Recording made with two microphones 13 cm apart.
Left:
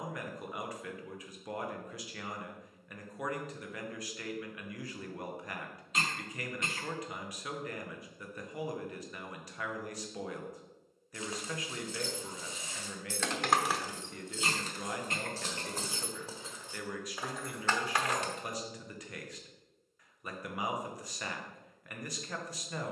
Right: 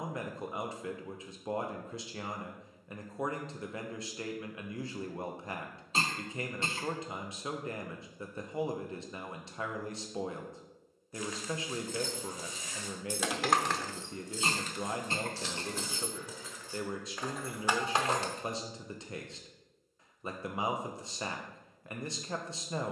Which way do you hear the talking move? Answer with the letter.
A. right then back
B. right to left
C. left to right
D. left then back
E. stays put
E.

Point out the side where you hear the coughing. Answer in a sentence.
In this clip you hear the coughing on the right.